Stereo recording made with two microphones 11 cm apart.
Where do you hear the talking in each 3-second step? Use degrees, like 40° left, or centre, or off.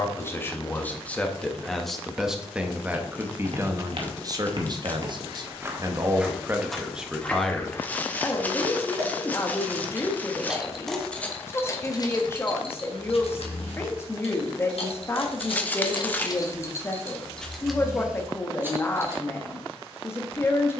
10° left, 30° right, centre, 20° left, 20° left, 20° left, 20° left.